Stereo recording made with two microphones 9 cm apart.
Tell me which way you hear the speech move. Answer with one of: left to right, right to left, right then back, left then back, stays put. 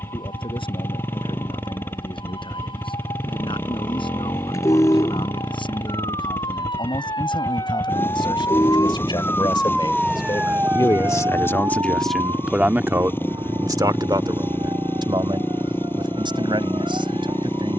left to right.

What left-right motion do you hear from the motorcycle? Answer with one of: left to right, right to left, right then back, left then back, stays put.
stays put.